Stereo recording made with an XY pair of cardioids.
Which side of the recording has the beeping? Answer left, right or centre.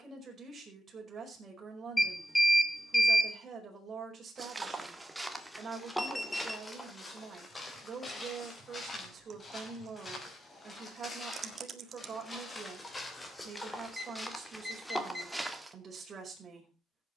centre.